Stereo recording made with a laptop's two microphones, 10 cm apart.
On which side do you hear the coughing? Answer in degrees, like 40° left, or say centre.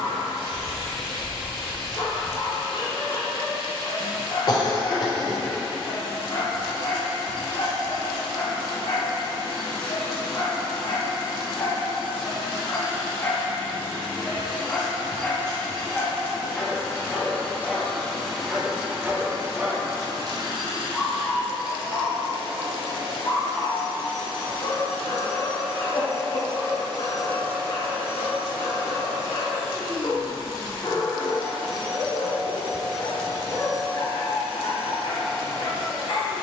40° left.